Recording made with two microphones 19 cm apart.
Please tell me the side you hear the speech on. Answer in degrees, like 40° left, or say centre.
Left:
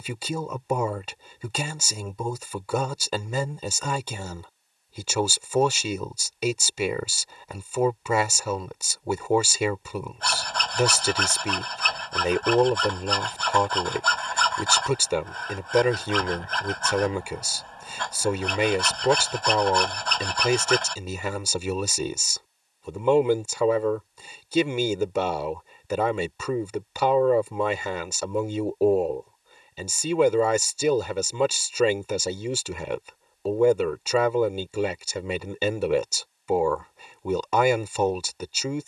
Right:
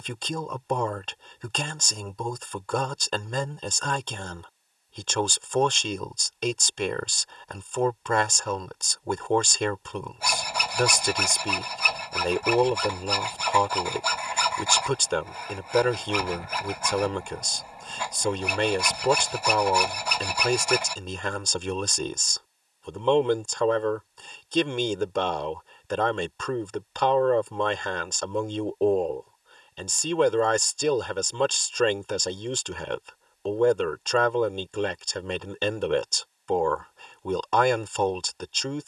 10° left.